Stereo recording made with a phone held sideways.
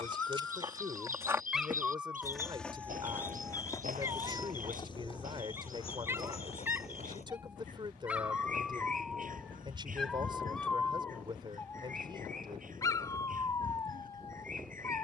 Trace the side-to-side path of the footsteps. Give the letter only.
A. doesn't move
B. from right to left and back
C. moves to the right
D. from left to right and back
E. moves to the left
E.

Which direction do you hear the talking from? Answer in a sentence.
In this clip you hear the talking on the right.